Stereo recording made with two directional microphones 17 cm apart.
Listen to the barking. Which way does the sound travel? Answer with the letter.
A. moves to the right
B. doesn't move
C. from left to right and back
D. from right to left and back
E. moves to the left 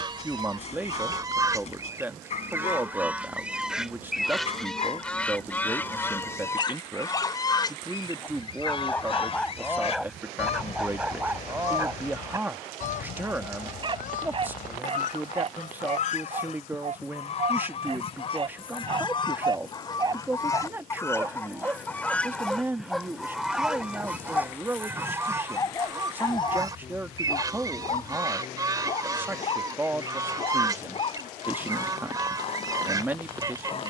C.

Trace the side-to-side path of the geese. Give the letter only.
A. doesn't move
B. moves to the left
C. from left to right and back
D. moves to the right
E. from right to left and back
E.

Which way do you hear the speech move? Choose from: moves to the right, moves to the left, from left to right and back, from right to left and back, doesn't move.
doesn't move.